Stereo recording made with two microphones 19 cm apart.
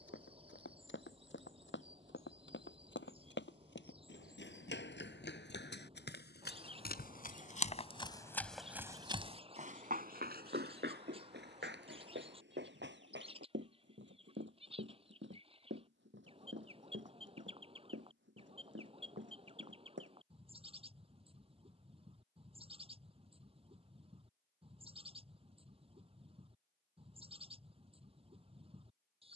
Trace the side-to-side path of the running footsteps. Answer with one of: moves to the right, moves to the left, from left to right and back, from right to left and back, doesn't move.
moves to the right.